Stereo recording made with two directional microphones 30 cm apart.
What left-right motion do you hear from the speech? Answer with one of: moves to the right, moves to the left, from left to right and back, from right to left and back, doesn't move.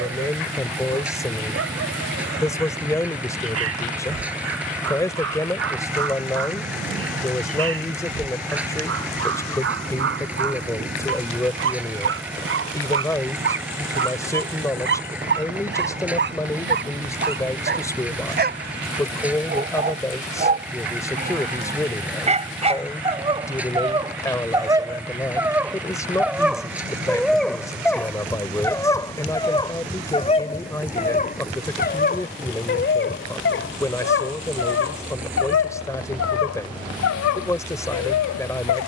doesn't move.